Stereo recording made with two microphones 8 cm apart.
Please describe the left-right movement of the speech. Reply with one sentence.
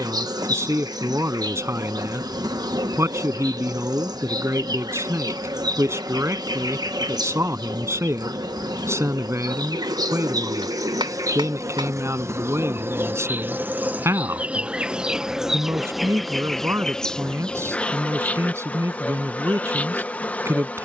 You can hear the speech stay in one place.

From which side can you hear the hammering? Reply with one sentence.
In this clip you hear the hammering on the right.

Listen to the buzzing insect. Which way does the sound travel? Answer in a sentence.
You can hear the buzzing insect travel towards the left.